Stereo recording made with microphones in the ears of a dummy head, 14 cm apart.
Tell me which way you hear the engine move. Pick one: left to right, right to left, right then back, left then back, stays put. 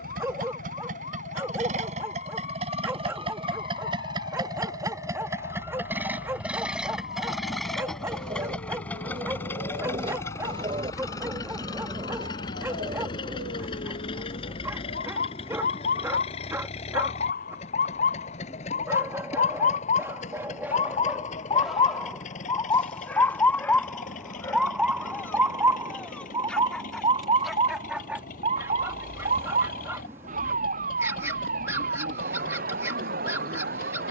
right to left.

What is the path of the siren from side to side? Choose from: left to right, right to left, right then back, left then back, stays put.
left to right.